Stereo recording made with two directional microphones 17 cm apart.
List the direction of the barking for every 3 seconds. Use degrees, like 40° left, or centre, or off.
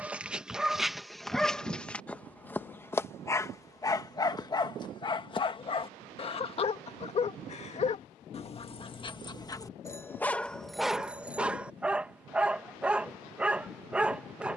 centre, 20° left, 40° left, 10° left, 10° right.